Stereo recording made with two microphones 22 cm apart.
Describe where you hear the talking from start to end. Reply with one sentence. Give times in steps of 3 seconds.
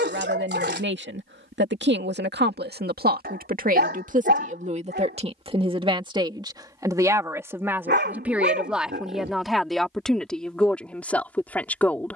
You can hear the talking on the right from 0 s and in the centre from 6 s.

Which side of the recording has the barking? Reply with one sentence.
In this clip you hear the barking on the right.